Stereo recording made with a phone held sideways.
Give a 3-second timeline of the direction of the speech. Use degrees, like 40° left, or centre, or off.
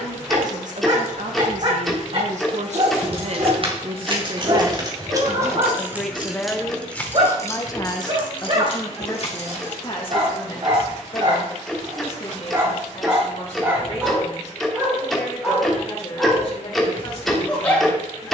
70° right, 30° right, 20° left, 40° left, 50° left, 50° left.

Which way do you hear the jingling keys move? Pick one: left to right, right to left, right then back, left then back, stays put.
right to left.